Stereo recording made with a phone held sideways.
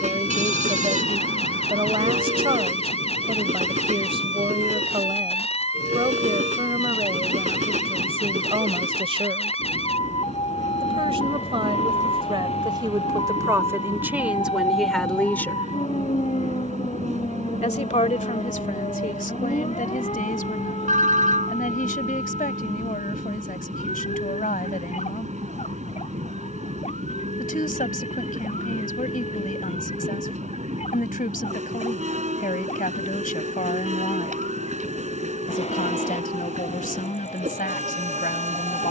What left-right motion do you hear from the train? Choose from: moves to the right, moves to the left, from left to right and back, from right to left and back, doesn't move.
doesn't move.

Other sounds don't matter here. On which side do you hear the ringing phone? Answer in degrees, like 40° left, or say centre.
60° right.